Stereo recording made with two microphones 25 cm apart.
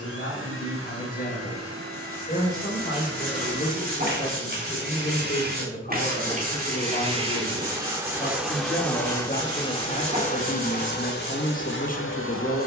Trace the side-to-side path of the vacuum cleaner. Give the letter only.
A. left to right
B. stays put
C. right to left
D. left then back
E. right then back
C.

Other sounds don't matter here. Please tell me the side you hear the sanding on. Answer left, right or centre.
right.